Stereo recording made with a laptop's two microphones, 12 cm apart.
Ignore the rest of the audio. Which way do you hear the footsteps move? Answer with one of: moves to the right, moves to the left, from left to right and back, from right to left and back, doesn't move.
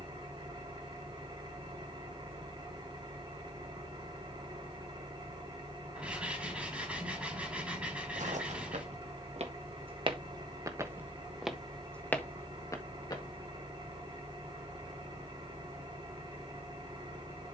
moves to the left.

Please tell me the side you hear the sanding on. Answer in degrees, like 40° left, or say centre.
10° right.